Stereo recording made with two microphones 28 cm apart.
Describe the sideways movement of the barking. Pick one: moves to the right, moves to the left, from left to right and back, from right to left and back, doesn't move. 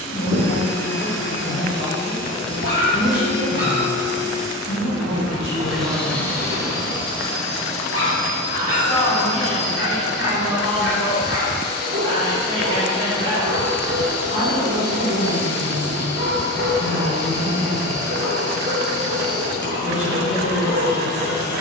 doesn't move.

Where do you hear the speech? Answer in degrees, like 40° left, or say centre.
50° left.